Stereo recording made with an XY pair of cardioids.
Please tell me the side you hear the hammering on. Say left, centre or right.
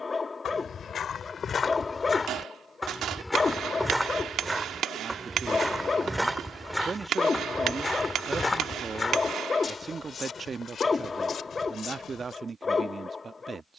right.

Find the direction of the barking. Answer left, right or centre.
left.